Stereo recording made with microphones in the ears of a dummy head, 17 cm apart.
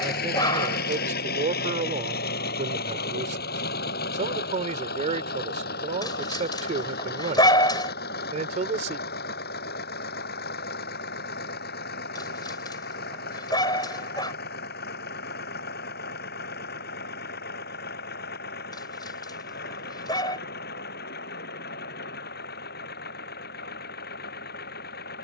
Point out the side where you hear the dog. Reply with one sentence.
In this clip you hear the dog on the left.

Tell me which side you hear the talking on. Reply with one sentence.
In this clip you hear the talking on the right.